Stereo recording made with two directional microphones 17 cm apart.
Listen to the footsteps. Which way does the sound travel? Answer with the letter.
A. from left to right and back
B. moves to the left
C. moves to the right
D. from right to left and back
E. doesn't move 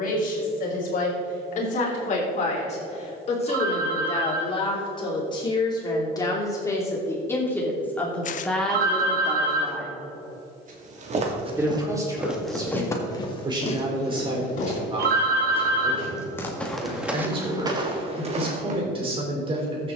D.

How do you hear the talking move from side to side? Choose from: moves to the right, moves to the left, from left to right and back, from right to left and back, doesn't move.
moves to the right.